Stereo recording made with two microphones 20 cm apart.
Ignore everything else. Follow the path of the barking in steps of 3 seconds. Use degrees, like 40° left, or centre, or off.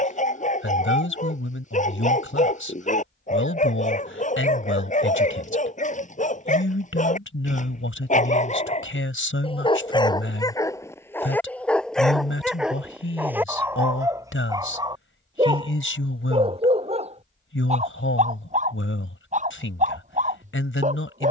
40° left, 40° left, 40° left, 20° left, 10° right, 30° right, 40° right.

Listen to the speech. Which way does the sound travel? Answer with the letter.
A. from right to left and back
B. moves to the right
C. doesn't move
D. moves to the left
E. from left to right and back
C.